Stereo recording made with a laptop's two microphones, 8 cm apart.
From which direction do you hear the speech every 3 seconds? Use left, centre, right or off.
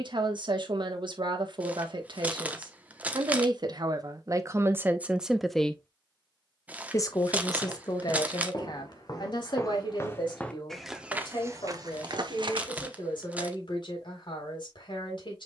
right, right, left, left, left.